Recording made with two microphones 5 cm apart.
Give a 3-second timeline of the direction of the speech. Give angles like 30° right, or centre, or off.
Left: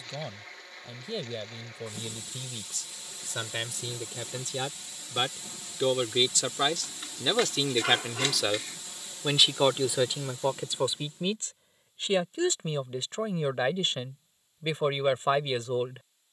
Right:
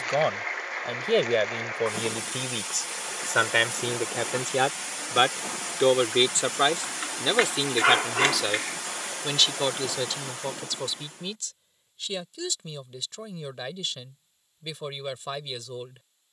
70° right, 50° right, 10° right, 20° left, 30° left, 30° left.